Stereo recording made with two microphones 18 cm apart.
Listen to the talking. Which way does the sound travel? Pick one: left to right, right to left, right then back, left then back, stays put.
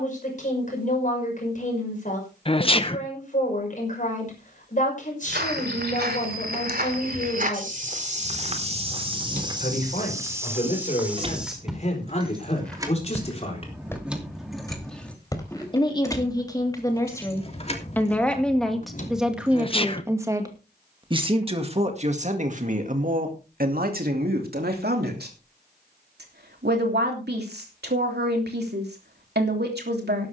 left to right.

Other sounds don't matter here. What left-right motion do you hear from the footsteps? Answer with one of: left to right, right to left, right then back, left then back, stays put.
right to left.